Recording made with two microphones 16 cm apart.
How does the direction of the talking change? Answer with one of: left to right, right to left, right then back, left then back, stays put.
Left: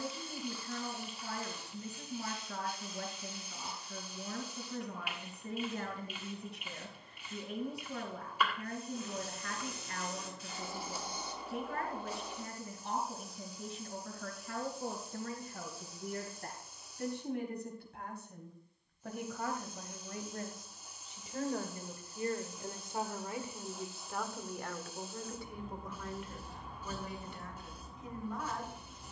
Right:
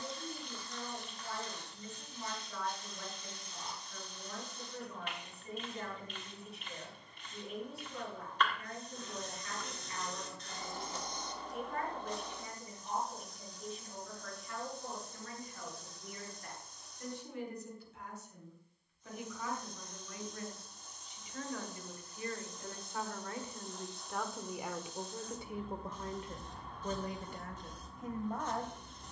left to right.